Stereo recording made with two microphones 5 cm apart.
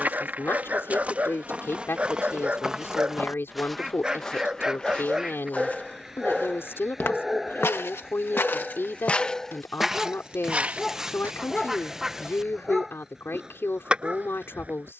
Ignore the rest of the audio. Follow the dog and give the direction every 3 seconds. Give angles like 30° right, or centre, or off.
30° right, 20° right, centre, 10° left, 10° right.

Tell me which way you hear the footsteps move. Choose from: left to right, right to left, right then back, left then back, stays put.
left then back.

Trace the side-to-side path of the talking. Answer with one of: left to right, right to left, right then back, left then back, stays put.
stays put.